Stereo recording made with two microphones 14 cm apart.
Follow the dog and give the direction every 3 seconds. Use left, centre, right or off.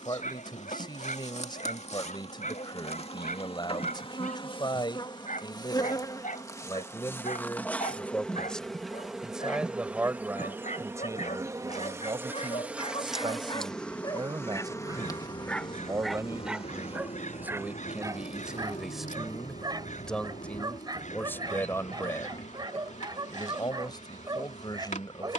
left, left, left, left, left, centre, right, right, right.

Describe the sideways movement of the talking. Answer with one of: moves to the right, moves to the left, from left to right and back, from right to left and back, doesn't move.
from left to right and back.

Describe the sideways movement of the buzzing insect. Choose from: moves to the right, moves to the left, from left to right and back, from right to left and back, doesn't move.
from left to right and back.